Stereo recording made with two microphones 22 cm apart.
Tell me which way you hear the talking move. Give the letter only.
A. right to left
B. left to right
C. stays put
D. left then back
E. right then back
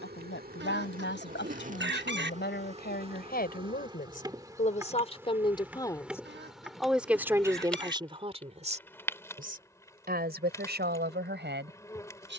B.